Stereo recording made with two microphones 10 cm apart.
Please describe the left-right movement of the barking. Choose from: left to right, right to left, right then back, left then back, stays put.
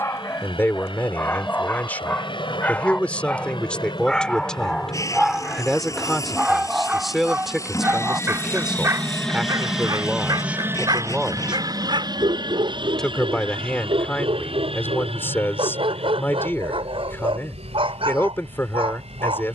left to right.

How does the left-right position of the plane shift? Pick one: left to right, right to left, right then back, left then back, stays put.
left to right.